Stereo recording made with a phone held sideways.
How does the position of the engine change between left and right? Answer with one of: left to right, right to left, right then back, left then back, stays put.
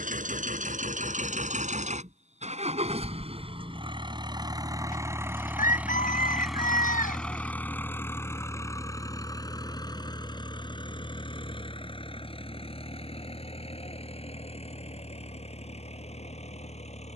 right to left.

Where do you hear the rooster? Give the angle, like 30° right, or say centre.
70° left.